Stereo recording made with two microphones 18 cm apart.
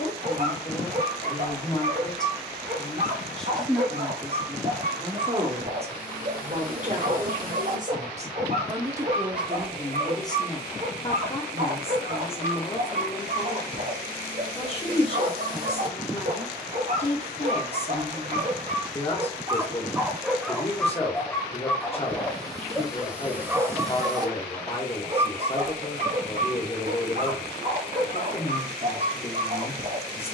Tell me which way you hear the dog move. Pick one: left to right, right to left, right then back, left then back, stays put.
left then back.